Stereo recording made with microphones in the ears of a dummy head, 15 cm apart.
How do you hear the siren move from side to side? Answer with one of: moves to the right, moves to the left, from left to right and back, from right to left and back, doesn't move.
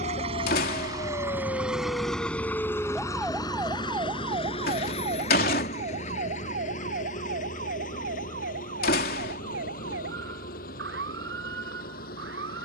moves to the right.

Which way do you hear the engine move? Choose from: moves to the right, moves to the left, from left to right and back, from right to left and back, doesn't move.
moves to the left.